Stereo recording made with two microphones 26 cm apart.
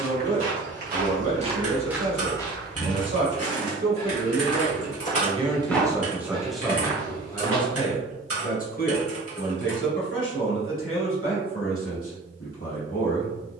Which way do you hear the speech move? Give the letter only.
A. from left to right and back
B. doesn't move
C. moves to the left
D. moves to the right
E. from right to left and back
C.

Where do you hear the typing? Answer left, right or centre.
right.